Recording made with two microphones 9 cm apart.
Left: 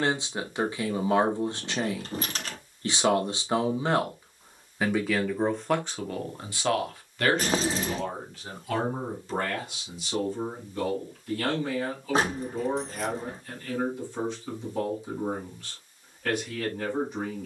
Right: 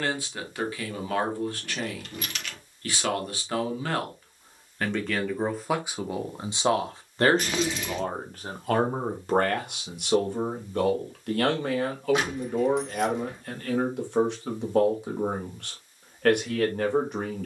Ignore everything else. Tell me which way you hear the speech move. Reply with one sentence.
In this clip you hear the speech go from the left side to the right.